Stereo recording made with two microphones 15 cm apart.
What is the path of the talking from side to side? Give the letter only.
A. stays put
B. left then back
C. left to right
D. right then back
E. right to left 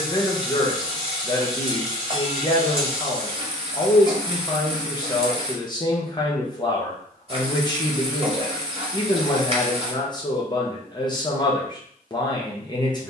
A.